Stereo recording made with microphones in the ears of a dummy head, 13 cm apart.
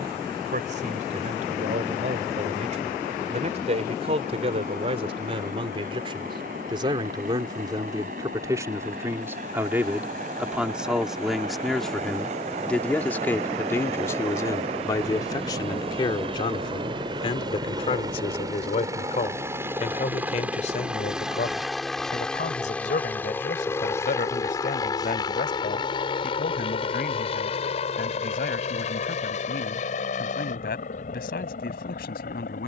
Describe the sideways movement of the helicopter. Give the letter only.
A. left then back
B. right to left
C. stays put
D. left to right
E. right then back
B.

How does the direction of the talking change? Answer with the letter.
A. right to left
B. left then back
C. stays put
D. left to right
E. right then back
A.